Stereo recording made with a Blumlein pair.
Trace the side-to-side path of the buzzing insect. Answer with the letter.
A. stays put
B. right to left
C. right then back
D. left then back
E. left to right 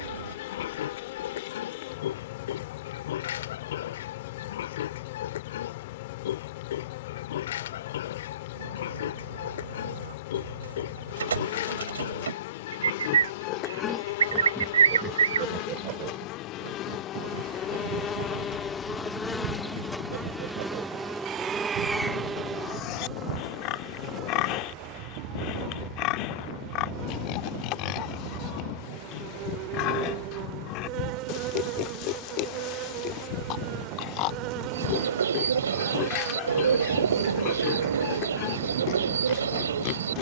E.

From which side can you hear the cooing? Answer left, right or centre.
right.